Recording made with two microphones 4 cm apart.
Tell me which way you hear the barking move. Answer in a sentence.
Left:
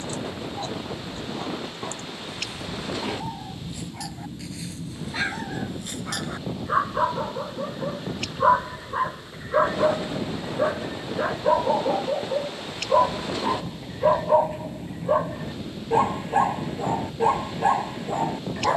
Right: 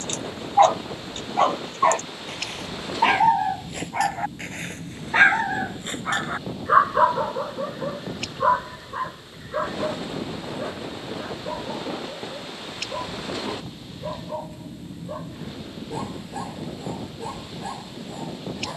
In this clip you hear the barking move to the left.